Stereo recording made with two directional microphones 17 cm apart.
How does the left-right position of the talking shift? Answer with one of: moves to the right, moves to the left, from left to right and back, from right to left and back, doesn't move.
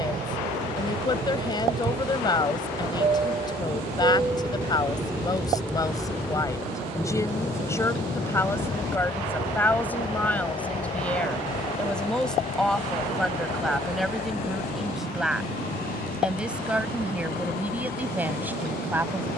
moves to the right.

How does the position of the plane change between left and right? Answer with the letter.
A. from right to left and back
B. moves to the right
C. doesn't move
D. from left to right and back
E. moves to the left
E.